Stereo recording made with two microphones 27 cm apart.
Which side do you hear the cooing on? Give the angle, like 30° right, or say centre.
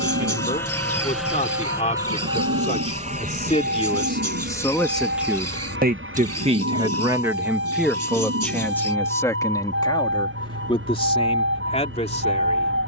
70° right.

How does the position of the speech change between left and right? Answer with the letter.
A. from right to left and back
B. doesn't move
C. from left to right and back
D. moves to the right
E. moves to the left
C.